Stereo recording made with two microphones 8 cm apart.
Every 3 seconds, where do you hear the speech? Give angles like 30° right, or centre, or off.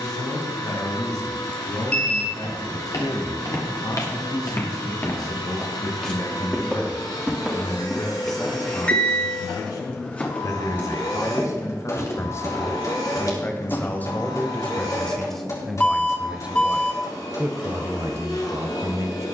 70° left, 60° left, 60° left, 50° left, 30° left, 10° right, 40° right.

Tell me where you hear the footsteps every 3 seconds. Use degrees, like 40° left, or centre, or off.
60° left, 40° left, centre, 20° left, 50° left, off, off.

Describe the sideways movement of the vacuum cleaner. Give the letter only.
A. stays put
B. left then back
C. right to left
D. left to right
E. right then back
A.